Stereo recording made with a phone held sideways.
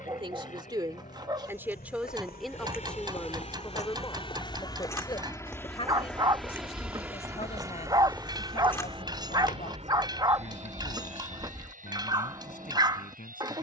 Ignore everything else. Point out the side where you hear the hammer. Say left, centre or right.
right.